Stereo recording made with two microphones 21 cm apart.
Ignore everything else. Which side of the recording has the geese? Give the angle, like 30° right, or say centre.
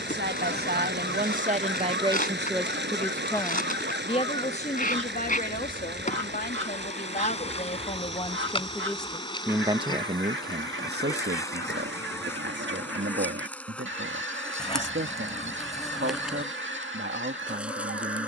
80° right.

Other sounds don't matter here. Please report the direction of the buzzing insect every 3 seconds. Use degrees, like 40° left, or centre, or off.
50° left, 40° left, 30° left, 20° left, 10° left, centre.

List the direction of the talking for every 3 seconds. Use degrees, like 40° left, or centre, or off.
30° right, 30° left, 40° left, 40° right, 70° right, 70° right.